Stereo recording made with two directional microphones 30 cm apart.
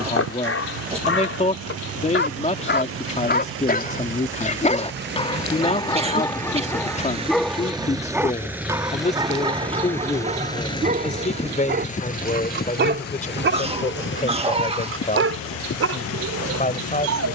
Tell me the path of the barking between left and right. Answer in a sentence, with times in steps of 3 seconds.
You can hear the barking on the left from 0 s, in the centre from 6 s and on the right from 9 s.